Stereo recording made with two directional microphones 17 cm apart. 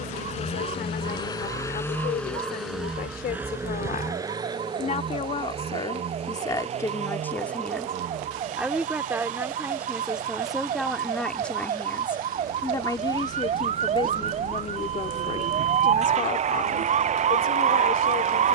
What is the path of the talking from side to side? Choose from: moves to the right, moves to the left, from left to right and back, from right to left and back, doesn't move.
from left to right and back.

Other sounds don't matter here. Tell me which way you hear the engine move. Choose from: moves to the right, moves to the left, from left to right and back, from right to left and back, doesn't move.
moves to the right.